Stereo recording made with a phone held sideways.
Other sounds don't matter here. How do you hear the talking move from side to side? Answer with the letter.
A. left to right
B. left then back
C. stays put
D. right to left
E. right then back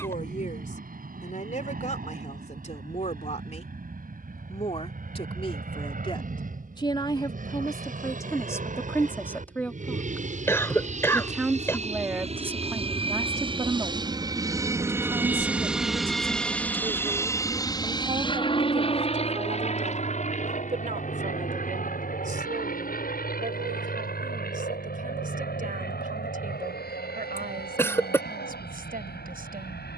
A.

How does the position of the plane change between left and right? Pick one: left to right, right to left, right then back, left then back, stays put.
right to left.